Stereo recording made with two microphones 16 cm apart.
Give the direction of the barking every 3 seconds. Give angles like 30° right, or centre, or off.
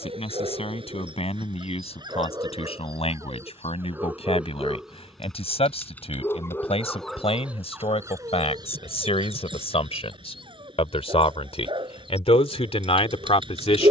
30° right, 10° right, 10° right, 30° right, 30° right.